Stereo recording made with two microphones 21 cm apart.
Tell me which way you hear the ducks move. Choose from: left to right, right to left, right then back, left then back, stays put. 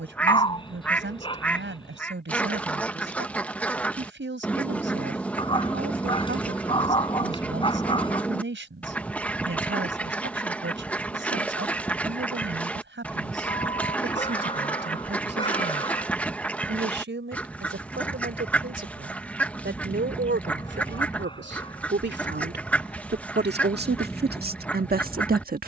stays put.